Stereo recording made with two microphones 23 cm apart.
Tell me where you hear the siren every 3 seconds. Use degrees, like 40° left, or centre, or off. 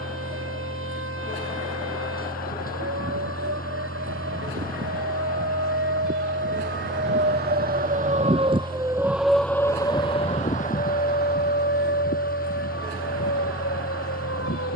80° right, 70° right, 40° right, 30° left, 60° left.